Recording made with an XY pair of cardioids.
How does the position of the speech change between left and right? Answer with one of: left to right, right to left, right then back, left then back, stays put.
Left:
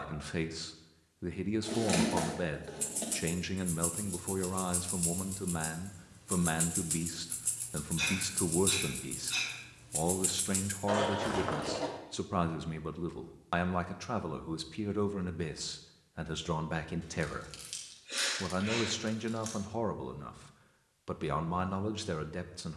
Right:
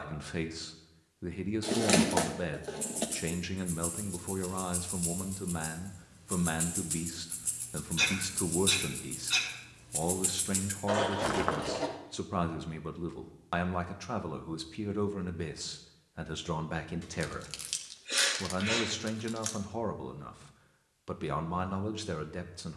stays put.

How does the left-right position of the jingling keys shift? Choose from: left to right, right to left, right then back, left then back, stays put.
left to right.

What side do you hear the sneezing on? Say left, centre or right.
right.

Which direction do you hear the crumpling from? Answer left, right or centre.
right.